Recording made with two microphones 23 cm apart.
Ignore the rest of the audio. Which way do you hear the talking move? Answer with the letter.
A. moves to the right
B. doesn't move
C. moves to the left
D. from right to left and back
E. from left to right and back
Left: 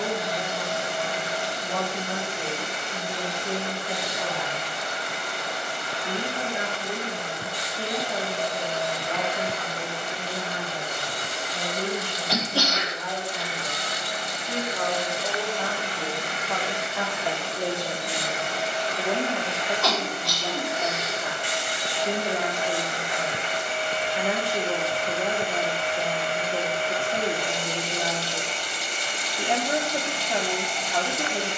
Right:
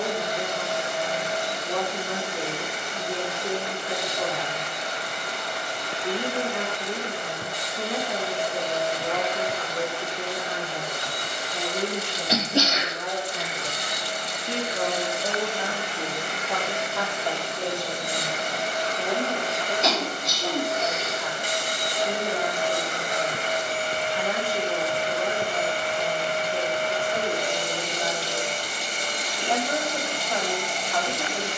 C.